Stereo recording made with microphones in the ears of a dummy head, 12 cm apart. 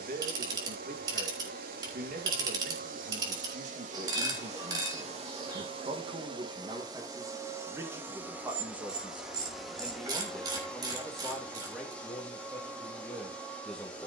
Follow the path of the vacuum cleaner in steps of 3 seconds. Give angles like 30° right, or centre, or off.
70° right, 50° right, 20° right, centre, 10° left.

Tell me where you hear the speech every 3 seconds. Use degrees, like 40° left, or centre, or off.
70° right, 50° right, 20° right, centre, 10° left.